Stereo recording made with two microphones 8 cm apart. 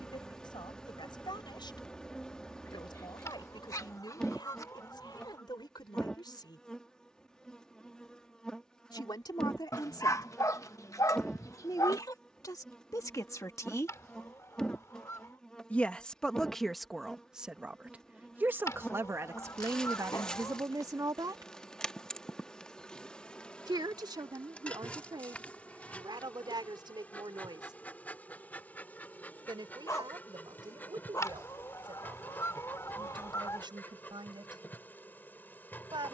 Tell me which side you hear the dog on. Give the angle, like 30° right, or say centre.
40° left.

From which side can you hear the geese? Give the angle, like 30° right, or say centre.
40° left.